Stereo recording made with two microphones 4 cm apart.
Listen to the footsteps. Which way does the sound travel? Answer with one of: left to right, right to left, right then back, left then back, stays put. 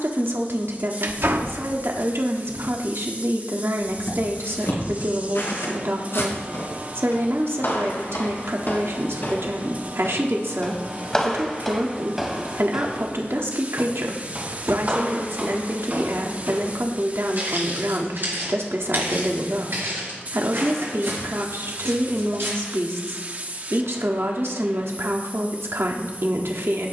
left to right.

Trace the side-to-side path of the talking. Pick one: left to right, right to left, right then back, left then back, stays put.
stays put.